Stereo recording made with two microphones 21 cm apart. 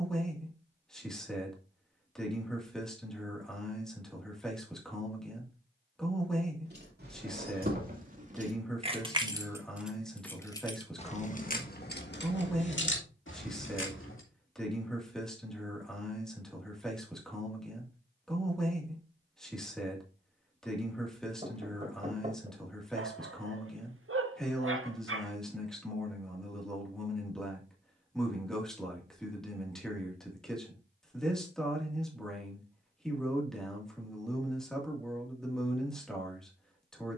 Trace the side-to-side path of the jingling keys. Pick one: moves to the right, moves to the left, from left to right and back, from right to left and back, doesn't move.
moves to the left.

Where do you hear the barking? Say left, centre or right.
right.